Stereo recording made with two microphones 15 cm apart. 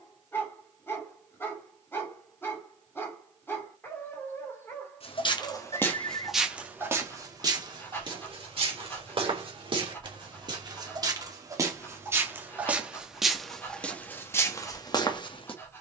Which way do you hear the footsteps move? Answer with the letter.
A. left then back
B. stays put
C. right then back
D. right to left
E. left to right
C.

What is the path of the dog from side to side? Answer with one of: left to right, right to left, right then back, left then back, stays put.
stays put.